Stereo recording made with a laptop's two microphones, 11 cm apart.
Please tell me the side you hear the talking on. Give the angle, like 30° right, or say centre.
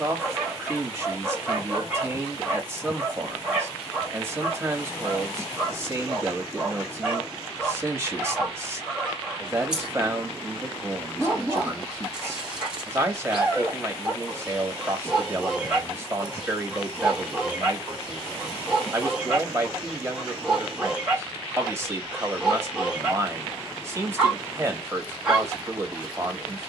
20° right.